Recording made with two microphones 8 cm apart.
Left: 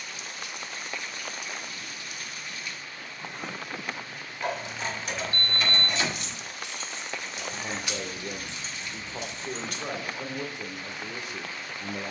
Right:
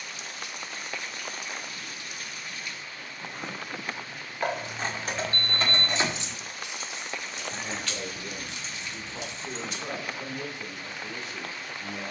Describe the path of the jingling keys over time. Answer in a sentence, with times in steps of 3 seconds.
In this clip you hear the jingling keys not at all from 0 s, on the right from 3 s, in the centre from 6 s and on the left from 9 s.